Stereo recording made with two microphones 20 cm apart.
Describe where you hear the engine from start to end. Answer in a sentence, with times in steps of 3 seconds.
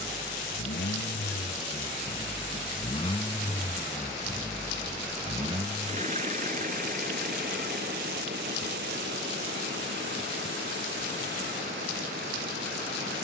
You can hear the engine on the left from 0 s, in the centre from 3 s and on the right from 6 s.